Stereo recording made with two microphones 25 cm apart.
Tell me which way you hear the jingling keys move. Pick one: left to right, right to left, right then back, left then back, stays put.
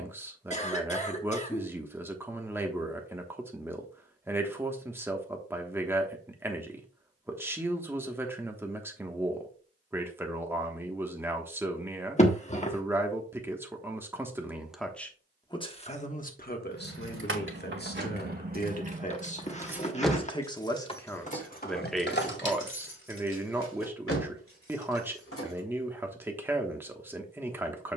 right to left.